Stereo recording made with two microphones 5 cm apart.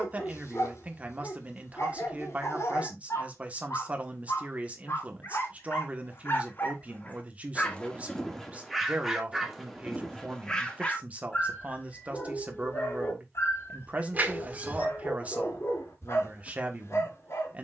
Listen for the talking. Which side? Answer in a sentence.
In this clip you hear the talking on the right.